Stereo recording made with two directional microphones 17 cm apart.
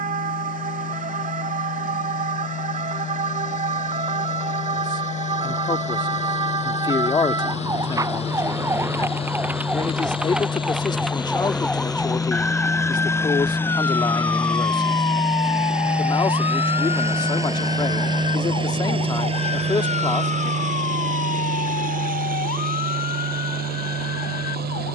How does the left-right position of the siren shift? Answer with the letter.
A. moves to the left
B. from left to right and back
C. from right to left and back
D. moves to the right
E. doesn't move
A.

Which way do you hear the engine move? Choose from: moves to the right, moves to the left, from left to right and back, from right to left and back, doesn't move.
moves to the right.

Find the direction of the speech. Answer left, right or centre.
left.